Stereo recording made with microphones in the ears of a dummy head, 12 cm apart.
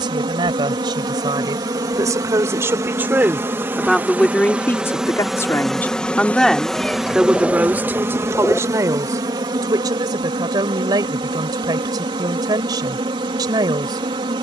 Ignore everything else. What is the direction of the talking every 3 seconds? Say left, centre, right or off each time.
right, centre, centre, right, right.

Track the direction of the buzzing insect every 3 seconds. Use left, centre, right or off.
right, centre, centre, right, right.